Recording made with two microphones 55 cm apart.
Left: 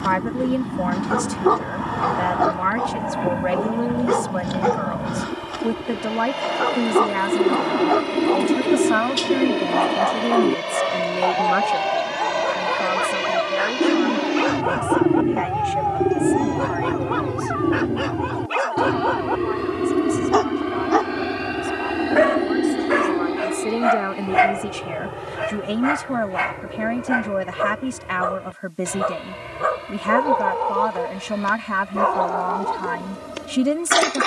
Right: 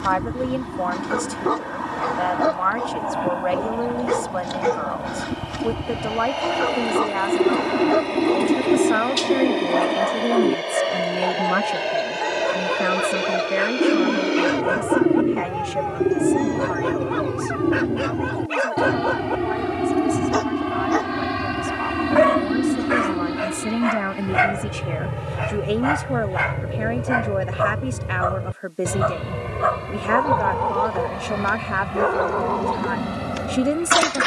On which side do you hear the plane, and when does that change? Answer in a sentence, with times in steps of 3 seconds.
In this clip you hear the plane on the left from 0 s, in the centre from 15 s and on the right from 21 s.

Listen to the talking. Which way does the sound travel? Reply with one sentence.
You can hear the talking go right and come back.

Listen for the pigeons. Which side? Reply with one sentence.
In this clip you hear the pigeons in the centre.